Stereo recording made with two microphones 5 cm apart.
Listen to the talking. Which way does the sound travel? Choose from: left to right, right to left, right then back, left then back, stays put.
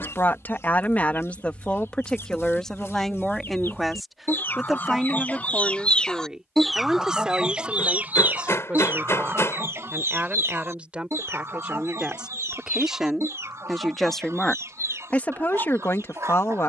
right then back.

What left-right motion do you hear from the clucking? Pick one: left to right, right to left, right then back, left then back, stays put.
left to right.